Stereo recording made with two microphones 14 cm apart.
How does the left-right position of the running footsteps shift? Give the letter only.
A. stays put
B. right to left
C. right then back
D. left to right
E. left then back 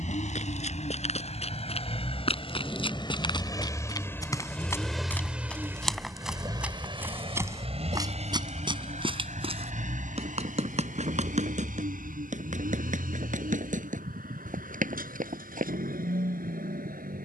D.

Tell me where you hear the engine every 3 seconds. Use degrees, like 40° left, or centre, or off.
50° left, 10° left, 40° right, 70° right, 70° right, 80° right.